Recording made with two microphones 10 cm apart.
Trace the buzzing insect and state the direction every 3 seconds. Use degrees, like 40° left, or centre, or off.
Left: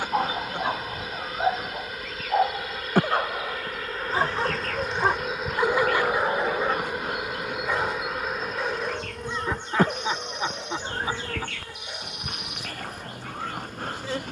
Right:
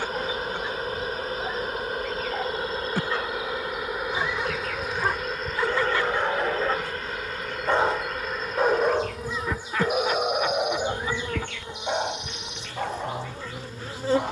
40° right, 10° right, 10° left, 10° right, 30° right.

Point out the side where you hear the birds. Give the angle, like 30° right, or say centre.
50° left.